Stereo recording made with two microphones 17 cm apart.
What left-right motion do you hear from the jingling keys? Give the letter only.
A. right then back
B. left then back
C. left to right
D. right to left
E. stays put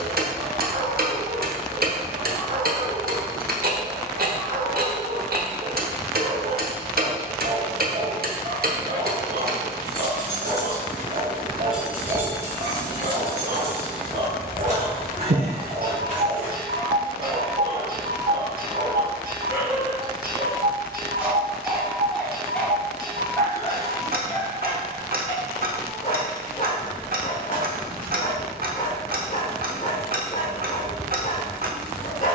C.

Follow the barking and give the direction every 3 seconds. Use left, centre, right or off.
right, right, right, right, right, right, right, centre, left, left, left.